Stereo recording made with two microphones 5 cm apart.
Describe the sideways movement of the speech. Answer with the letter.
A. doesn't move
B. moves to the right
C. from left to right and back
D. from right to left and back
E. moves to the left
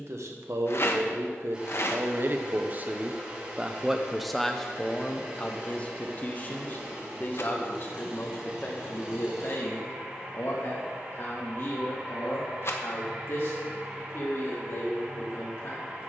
E.